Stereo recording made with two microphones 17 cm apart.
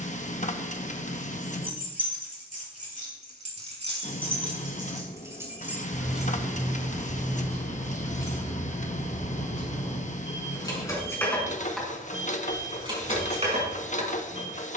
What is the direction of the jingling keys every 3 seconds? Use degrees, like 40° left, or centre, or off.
50° right, 30° right, 10° left, 20° left, 40° right.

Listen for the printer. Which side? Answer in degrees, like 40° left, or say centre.
50° left.